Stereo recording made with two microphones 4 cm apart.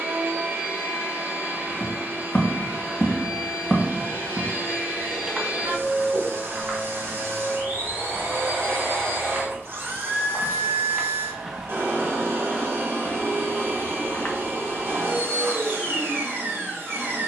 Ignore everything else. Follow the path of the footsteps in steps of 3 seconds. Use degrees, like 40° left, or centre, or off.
50° left, centre, 40° right, 20° right, 40° left, off.